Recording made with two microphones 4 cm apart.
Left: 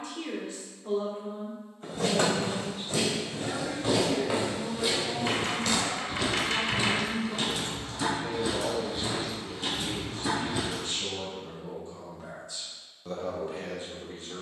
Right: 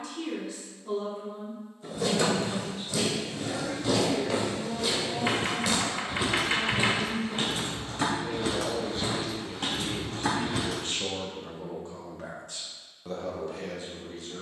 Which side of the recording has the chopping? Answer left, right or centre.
right.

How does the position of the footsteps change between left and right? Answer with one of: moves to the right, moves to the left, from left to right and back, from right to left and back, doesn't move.
moves to the right.